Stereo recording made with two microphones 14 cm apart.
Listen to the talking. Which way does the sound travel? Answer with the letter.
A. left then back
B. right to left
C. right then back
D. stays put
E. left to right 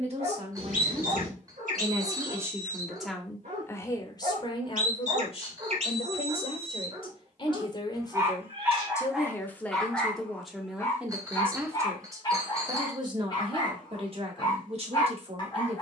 A.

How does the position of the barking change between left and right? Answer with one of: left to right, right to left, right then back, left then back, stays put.
right to left.